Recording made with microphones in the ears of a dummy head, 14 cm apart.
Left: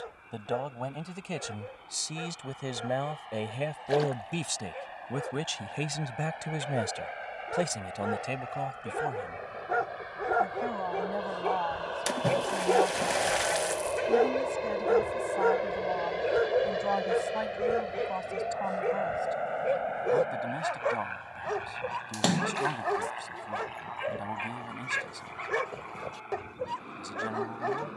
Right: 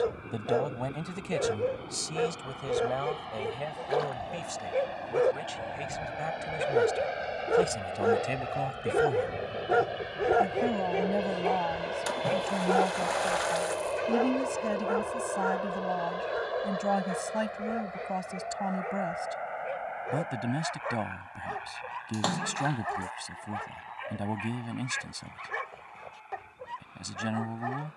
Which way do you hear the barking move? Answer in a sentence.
In this clip you hear the barking travel towards the left.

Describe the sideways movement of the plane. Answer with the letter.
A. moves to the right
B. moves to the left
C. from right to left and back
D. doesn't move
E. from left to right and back
B.